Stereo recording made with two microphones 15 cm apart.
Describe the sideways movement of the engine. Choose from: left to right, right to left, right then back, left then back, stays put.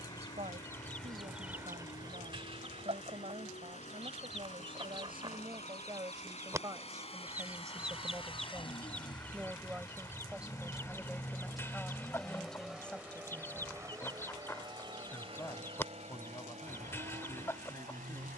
left to right.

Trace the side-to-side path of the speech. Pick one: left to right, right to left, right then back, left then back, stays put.
right to left.